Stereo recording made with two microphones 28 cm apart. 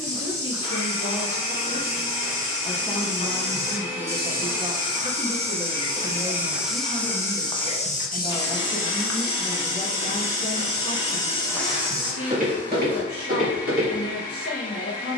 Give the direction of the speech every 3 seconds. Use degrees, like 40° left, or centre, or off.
30° left, 10° right, 10° right, 30° left, 50° left.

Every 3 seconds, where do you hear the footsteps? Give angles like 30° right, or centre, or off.
50° right, 30° right, 20° left, 40° left, 40° right.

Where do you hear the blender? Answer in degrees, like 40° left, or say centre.
20° left.